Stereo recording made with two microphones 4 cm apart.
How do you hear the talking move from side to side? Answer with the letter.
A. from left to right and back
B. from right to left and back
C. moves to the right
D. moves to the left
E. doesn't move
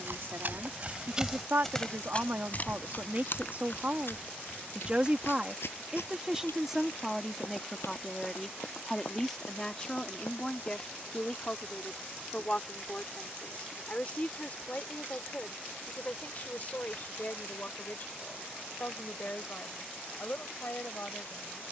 D.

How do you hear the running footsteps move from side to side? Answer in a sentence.
You can hear the running footsteps move to the left.